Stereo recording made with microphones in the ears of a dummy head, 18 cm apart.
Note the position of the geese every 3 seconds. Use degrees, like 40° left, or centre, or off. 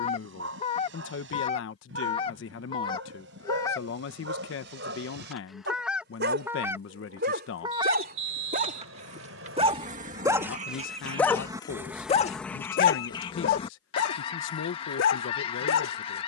30° left, 10° left, 20° right, 30° right, 20° left, 30° left.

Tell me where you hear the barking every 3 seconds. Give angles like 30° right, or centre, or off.
70° right, 60° right, 50° right, 10° right, 50° left, 70° left.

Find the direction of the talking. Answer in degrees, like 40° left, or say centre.
70° left.